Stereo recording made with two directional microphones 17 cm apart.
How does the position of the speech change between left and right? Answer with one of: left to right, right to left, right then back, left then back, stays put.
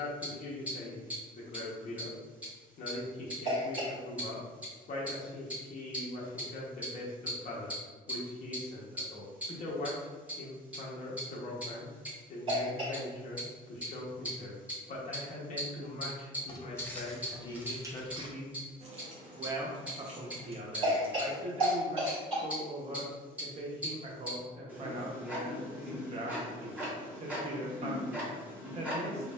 left to right.